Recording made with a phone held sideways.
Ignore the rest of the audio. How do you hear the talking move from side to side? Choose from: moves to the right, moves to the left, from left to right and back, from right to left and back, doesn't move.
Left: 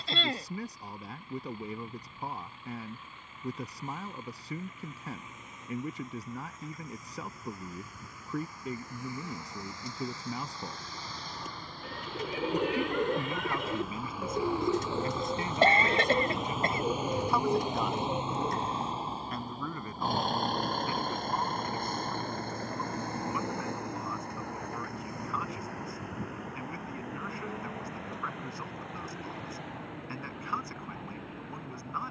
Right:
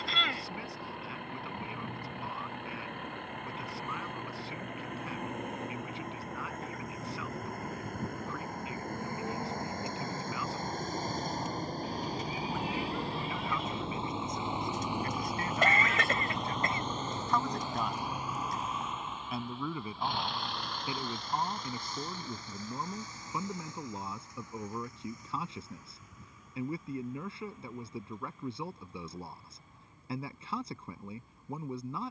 moves to the right.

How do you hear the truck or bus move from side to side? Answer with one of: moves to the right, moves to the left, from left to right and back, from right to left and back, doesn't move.
moves to the left.